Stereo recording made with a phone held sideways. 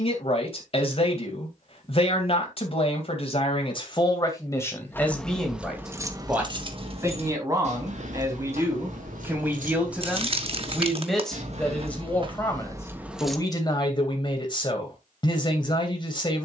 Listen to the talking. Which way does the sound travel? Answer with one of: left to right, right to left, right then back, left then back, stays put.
right then back.